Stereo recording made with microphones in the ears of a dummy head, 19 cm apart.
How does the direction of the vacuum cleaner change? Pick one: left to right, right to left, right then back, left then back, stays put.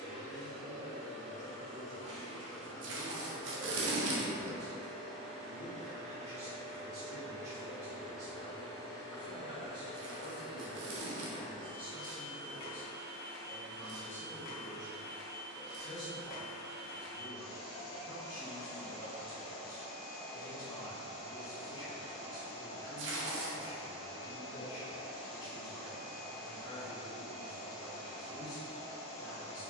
right to left.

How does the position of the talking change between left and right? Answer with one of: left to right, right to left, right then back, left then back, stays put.
right to left.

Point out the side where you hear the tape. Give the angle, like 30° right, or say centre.
60° right.